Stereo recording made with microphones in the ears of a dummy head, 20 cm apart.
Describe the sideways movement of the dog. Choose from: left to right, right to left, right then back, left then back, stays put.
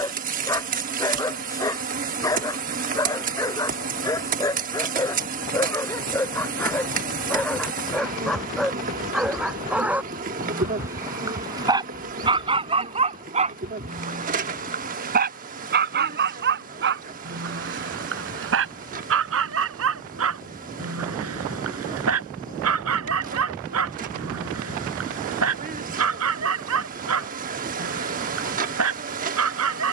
left to right.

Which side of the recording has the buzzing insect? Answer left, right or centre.
right.